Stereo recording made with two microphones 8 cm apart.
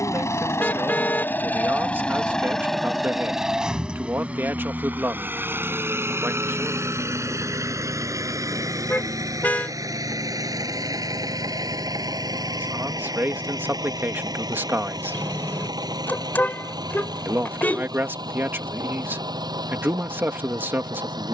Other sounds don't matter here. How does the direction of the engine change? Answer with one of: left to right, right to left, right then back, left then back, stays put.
left to right.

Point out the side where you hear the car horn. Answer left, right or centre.
left.